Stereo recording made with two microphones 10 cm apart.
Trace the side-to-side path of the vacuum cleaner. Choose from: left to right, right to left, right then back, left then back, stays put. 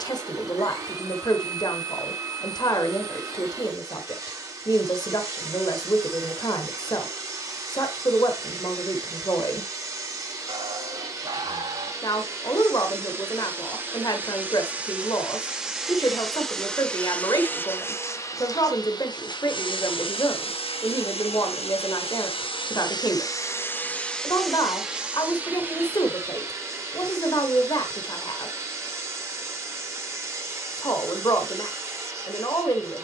left then back.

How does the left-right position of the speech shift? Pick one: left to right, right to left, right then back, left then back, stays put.
stays put.